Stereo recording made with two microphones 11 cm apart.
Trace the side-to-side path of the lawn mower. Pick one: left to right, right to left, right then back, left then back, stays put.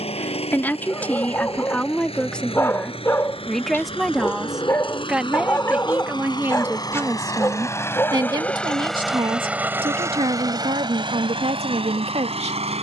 left to right.